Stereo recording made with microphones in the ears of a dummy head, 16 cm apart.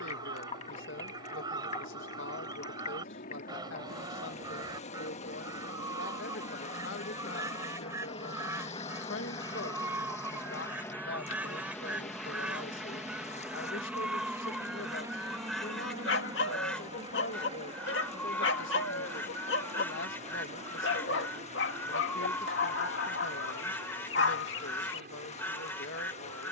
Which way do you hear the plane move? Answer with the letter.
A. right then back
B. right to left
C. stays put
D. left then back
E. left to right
E.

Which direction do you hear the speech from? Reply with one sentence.
In this clip you hear the speech on the left.